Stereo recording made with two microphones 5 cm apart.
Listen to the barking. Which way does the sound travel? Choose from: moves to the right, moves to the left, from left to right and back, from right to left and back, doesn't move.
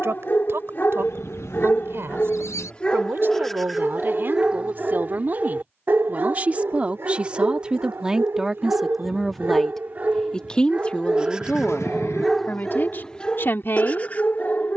from left to right and back.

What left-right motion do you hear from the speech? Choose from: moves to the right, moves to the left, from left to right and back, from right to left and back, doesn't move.
moves to the left.